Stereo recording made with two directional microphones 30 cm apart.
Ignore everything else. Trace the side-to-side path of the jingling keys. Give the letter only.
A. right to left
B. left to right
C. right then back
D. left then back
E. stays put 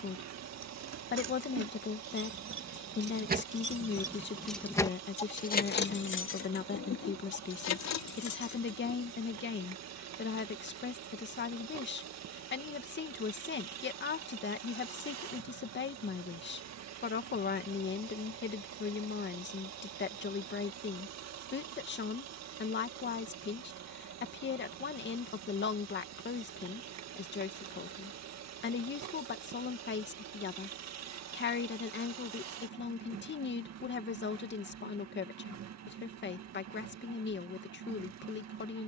A.